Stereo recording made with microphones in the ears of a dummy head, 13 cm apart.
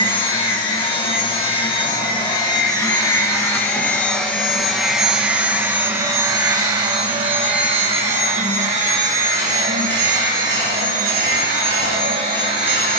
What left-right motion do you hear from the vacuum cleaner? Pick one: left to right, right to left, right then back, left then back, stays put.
left to right.